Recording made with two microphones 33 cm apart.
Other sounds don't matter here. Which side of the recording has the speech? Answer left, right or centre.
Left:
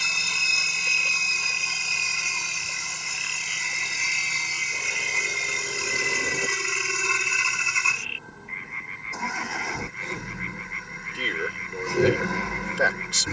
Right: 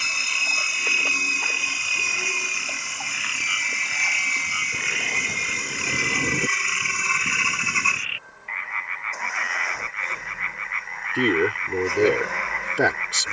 right.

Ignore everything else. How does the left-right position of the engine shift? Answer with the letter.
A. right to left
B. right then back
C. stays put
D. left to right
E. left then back
C.